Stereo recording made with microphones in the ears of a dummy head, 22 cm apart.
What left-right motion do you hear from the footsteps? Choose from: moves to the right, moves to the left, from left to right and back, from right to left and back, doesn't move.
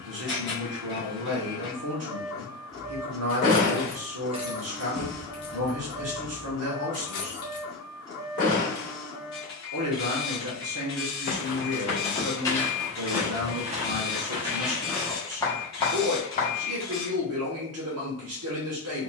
from left to right and back.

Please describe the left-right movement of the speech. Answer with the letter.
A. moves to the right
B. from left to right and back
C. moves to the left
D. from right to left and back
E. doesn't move
E.